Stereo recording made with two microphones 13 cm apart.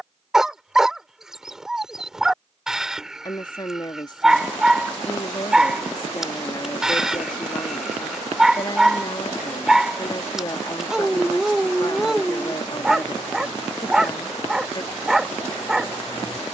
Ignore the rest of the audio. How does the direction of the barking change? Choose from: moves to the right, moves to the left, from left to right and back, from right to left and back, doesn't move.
doesn't move.